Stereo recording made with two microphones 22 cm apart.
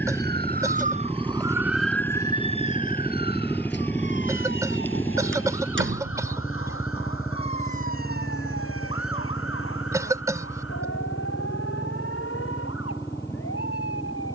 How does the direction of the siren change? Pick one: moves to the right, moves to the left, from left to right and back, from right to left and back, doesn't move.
moves to the left.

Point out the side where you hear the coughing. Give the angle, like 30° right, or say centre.
10° right.